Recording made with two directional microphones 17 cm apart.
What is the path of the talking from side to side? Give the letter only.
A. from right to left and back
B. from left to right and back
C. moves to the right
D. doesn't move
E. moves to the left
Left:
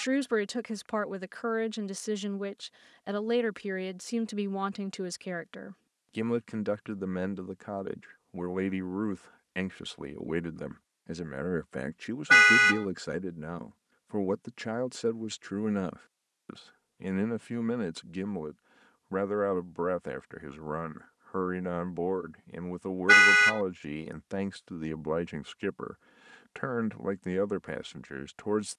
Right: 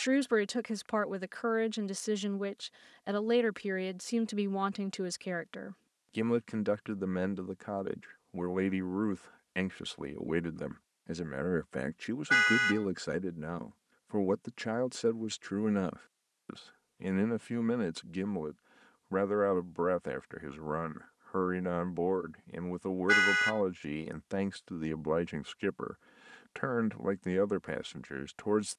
D.